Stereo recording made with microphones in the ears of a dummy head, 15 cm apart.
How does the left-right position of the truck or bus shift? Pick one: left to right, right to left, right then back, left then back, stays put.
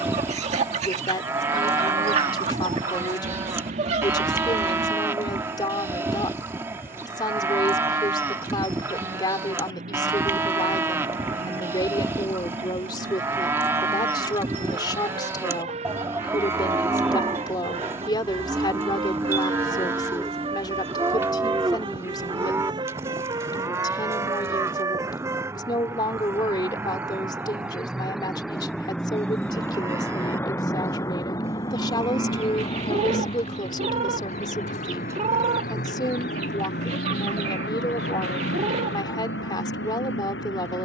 right to left.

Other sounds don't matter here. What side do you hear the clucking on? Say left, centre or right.
right.